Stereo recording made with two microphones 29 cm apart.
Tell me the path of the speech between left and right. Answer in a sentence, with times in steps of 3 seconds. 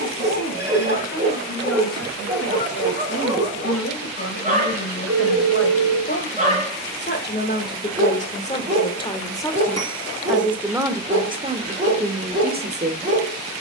You can hear the speech on the left from 0 s, in the centre from 9 s and on the right from 12 s.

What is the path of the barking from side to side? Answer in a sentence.
In this clip you hear the barking stay put.